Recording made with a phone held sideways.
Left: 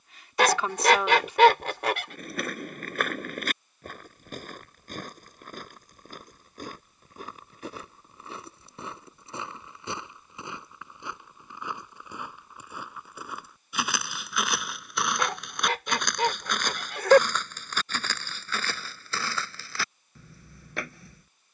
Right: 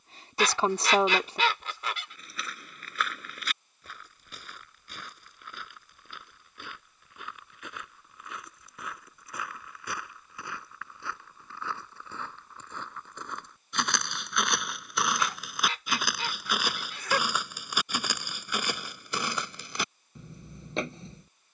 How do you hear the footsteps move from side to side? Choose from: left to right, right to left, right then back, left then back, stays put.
left to right.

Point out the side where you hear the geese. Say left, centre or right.
left.